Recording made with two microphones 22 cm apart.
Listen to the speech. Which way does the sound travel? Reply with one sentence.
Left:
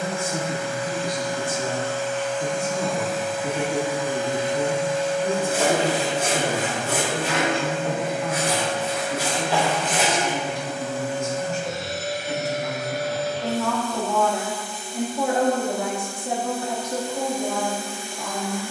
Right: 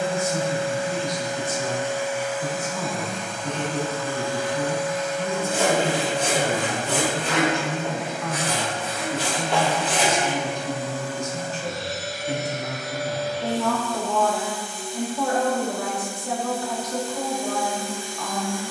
In this clip you hear the speech go right and come back.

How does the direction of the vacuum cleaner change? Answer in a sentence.
In this clip you hear the vacuum cleaner move from right to left.